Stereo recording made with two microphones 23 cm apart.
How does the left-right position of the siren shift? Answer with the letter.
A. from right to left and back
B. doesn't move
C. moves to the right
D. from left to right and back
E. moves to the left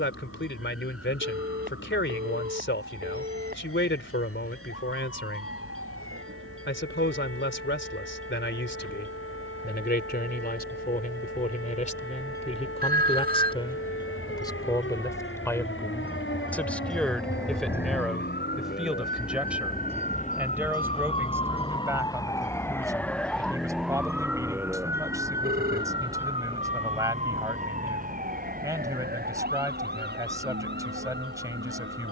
C.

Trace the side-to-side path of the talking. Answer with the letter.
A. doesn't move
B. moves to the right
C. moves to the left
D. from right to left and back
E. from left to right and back
B.